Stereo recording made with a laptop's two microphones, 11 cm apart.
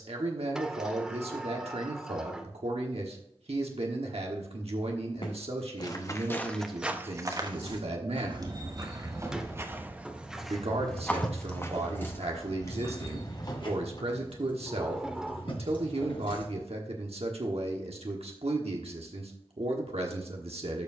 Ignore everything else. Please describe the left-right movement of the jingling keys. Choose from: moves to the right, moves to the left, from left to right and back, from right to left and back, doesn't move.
moves to the left.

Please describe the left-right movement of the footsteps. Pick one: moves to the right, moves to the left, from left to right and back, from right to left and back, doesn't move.
from left to right and back.